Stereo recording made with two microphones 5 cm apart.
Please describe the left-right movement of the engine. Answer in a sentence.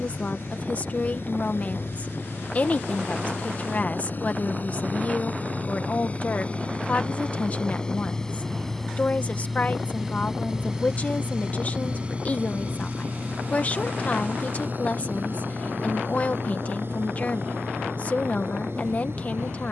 You can hear the engine move to the right.